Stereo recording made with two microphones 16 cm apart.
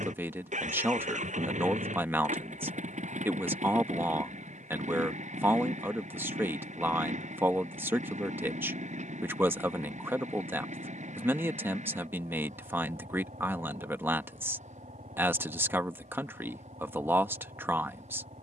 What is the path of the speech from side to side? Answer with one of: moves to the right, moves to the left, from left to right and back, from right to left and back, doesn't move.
doesn't move.